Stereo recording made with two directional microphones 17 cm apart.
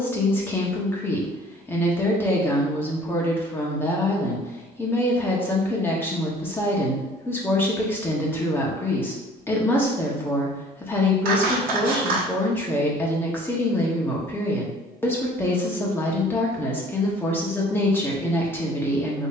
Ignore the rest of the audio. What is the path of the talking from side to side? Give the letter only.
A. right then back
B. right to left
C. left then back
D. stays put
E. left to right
D.